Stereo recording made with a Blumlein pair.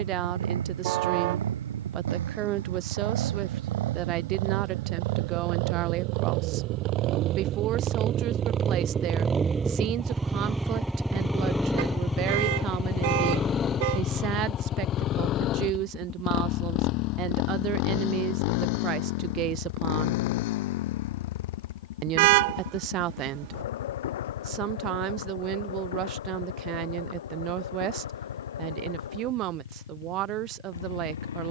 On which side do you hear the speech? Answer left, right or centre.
right.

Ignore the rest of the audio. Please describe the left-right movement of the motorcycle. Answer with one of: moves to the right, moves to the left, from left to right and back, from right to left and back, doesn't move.
moves to the left.